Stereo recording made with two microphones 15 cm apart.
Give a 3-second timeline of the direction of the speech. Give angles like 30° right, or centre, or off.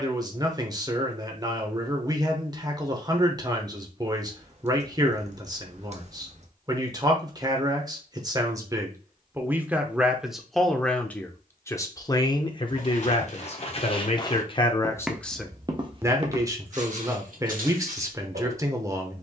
30° right, 30° right, 20° right, centre, 30° left, 10° right, 20° right.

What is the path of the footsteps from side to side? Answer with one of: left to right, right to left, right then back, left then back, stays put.
left to right.